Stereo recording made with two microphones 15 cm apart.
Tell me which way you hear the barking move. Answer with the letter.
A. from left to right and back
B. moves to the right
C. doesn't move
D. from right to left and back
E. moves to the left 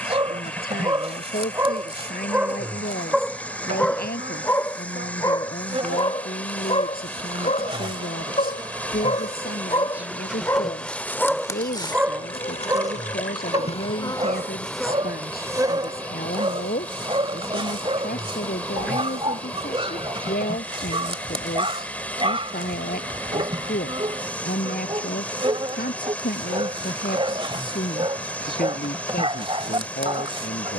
D.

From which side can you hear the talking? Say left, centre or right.
left.